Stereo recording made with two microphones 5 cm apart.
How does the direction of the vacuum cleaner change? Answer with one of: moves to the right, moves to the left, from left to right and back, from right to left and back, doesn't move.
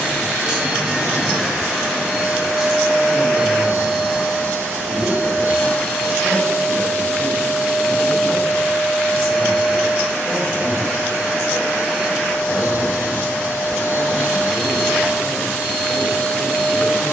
moves to the left.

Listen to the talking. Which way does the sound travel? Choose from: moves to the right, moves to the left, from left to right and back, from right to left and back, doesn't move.
doesn't move.